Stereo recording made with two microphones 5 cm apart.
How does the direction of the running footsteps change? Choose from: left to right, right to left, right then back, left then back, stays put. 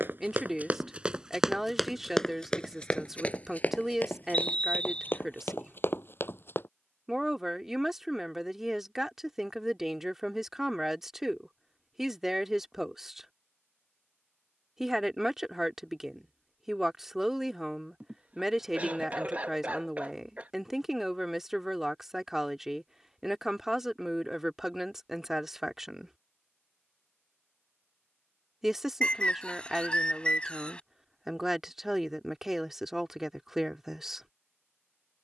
right to left.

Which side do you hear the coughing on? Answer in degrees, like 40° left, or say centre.
30° right.